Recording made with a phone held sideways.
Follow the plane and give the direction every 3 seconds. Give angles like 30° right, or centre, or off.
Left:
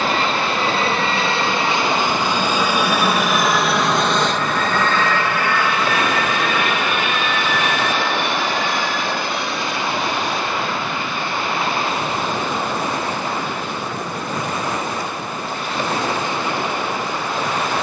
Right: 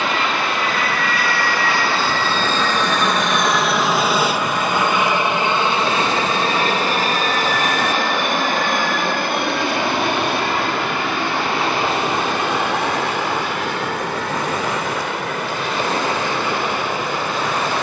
20° left, 10° right, 40° right, 60° right, 70° right, 70° right.